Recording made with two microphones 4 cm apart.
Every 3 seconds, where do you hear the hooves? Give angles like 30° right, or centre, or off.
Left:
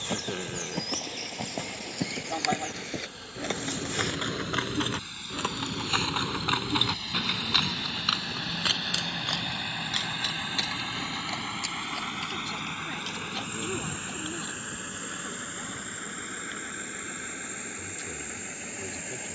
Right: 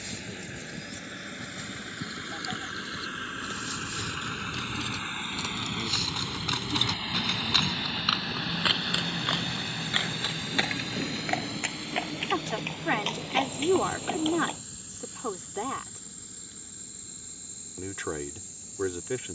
80° left, 50° left, 10° left, 30° right, 50° right, off, off.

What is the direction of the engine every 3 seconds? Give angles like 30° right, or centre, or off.
60° right, 40° right, 10° right, 20° left, 50° left, 70° left, 70° left.